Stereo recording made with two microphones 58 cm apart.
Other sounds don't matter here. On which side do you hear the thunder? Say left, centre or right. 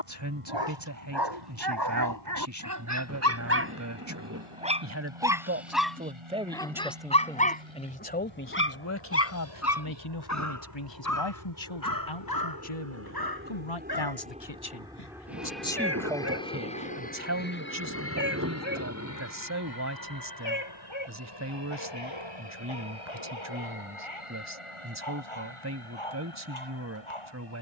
right.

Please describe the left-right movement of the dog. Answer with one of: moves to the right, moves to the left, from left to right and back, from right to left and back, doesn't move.
moves to the left.